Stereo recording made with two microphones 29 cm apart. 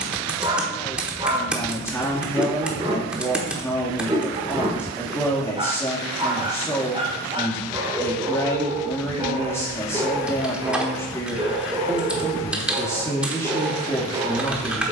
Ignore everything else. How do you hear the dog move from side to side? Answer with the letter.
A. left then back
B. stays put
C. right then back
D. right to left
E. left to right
B.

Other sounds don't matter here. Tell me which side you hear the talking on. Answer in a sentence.
You can hear the talking in the centre.